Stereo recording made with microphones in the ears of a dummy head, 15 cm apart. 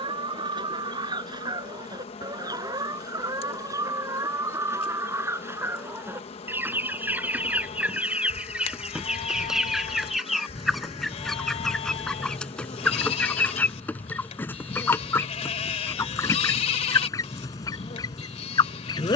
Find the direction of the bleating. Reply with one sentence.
In this clip you hear the bleating on the left.